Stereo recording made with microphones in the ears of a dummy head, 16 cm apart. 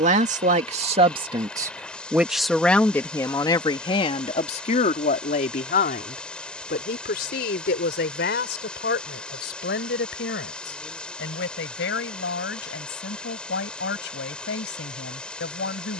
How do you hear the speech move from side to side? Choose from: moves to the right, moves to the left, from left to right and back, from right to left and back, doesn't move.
moves to the left.